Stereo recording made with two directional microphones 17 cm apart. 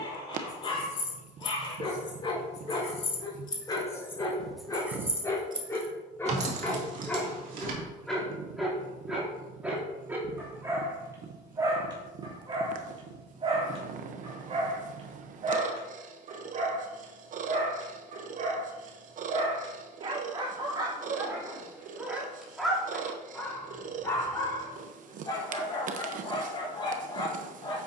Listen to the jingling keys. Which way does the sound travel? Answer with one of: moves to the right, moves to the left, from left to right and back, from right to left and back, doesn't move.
moves to the right.